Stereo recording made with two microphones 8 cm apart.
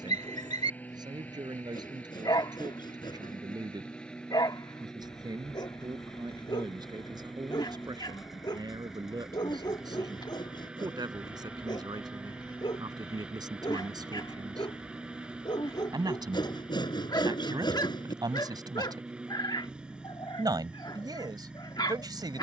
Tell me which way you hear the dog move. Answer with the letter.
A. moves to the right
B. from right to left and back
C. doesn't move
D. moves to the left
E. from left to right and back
C.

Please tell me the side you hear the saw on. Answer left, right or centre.
left.